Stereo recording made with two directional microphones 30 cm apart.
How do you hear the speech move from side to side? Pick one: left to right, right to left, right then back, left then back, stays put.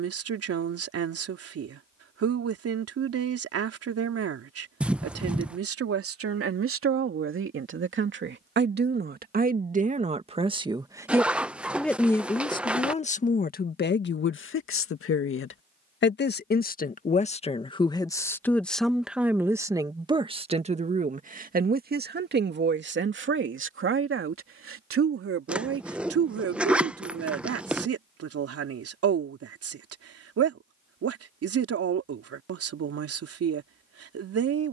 left then back.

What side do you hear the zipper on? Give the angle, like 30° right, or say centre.
centre.